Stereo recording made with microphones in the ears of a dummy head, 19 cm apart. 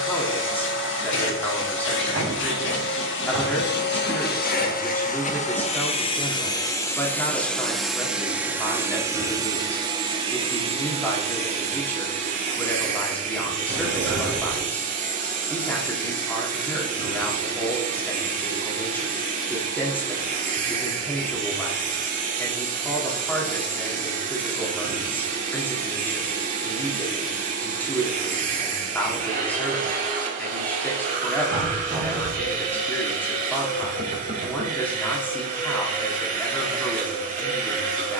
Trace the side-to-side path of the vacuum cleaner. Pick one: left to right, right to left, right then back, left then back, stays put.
left to right.